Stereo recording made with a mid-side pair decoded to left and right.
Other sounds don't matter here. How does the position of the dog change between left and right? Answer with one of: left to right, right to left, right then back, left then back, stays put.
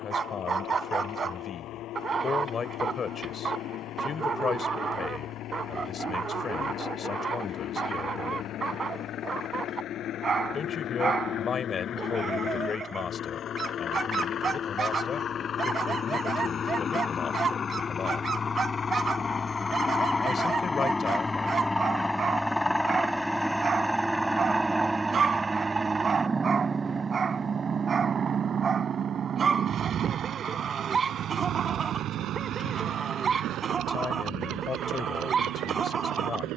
stays put.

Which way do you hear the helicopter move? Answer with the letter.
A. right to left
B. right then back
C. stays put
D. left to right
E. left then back
D.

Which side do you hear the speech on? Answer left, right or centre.
left.